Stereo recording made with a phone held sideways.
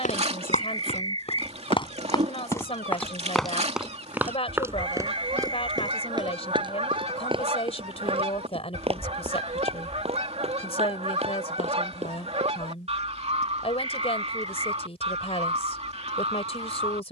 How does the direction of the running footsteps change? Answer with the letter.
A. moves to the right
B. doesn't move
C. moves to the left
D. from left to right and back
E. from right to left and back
A.